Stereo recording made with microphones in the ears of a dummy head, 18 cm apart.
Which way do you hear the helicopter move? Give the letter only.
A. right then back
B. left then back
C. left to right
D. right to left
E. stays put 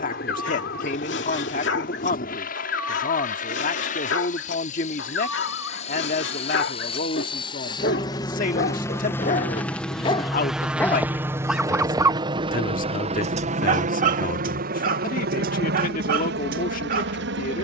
C.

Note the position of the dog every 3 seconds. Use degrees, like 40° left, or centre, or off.
70° left, 70° left, 60° left, 20° left, 40° right, 50° right.